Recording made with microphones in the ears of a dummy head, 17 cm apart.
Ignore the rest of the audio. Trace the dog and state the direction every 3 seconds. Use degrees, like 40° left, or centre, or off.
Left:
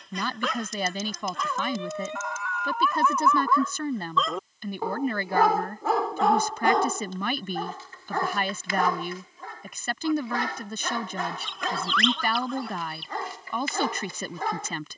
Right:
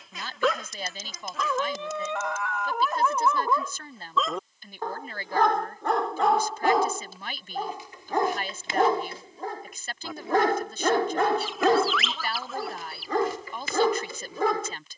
60° right, 10° right, 10° right, 40° right, 70° right.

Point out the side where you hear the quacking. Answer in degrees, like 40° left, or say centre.
centre.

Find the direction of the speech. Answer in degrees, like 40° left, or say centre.
50° left.